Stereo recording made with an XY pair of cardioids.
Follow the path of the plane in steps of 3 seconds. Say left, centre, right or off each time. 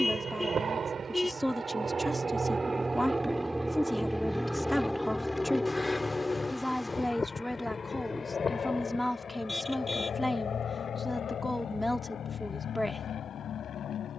right, centre, left, left, left.